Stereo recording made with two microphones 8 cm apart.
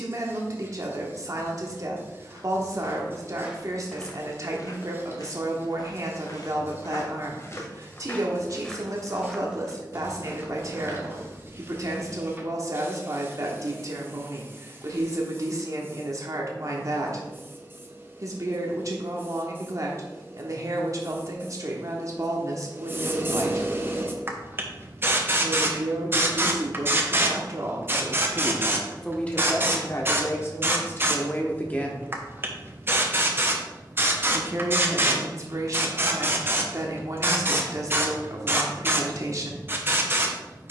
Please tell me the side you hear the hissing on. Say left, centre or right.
right.